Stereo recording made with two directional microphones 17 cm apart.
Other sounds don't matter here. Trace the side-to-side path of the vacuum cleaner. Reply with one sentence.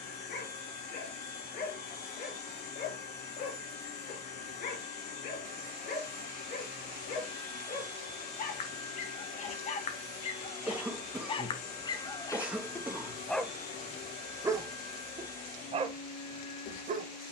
You can hear the vacuum cleaner stay put.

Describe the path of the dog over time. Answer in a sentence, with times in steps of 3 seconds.
In this clip you hear the dog on the left from 0 s, in the centre from 12 s and on the right from 15 s.